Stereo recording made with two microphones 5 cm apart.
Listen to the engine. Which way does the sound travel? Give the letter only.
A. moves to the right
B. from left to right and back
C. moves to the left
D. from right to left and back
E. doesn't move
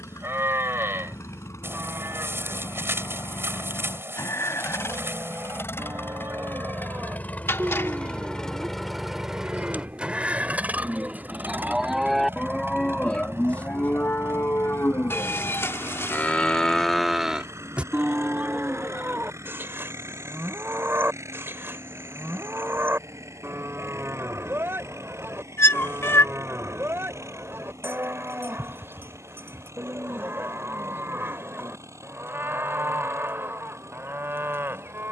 A.